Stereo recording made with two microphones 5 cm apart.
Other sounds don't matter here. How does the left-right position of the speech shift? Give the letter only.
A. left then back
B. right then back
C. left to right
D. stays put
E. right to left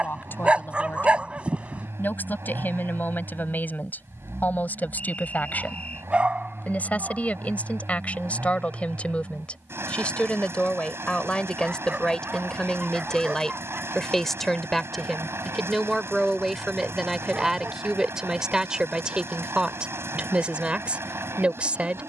C.